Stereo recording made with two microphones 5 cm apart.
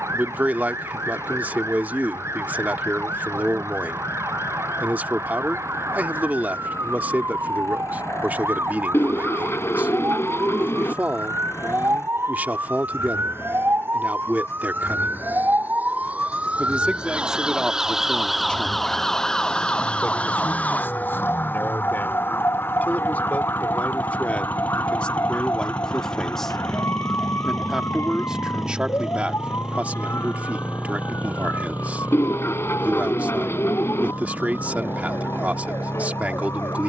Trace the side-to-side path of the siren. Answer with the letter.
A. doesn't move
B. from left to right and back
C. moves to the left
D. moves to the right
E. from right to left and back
C.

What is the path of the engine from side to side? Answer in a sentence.
In this clip you hear the engine move to the right.